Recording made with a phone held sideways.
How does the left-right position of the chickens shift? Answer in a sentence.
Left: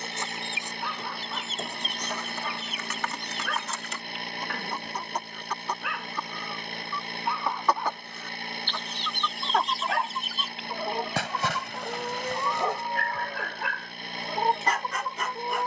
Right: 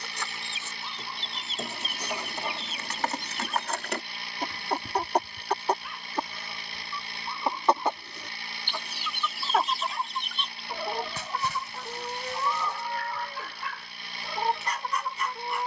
In this clip you hear the chickens go right and come back.